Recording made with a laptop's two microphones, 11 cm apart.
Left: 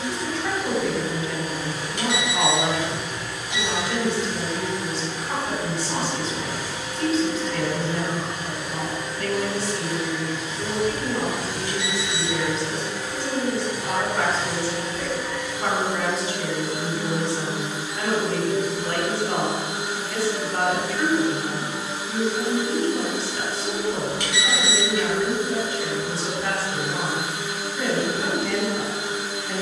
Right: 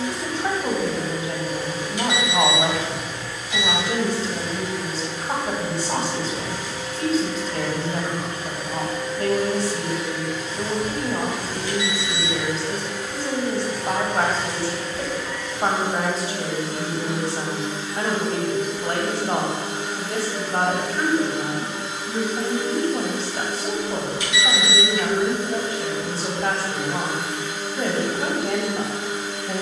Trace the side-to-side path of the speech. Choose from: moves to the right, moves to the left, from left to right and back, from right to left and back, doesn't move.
doesn't move.